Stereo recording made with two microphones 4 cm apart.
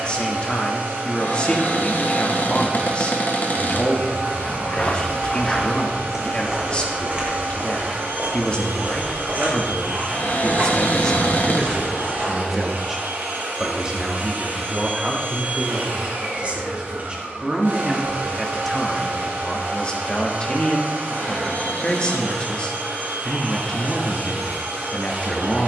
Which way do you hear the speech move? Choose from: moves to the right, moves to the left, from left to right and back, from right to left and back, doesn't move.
from left to right and back.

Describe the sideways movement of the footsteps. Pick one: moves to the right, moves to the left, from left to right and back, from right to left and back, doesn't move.
moves to the right.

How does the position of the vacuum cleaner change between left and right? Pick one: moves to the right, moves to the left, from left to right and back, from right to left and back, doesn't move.
doesn't move.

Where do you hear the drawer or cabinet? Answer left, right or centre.
left.